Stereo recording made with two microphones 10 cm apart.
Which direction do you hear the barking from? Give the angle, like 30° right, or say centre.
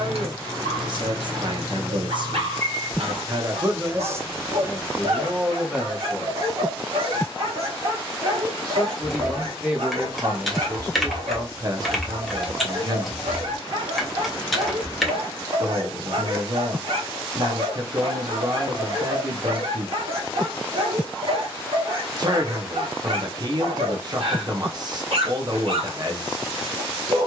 70° right.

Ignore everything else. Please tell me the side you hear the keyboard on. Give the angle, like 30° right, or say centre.
centre.